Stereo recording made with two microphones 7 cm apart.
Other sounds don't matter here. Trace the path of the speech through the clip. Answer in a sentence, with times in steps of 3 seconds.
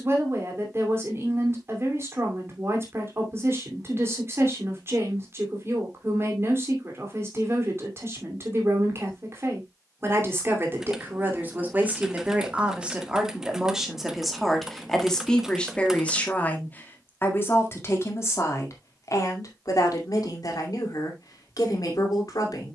In this clip you hear the speech on the right from 0 s, in the centre from 12 s and on the left from 15 s.